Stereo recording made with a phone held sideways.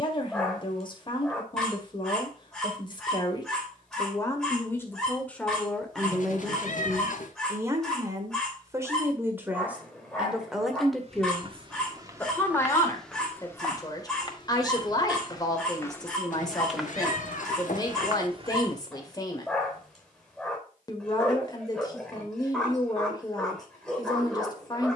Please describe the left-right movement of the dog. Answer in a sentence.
In this clip you hear the dog stay in one place.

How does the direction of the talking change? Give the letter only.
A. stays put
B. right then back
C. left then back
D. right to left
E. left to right
B.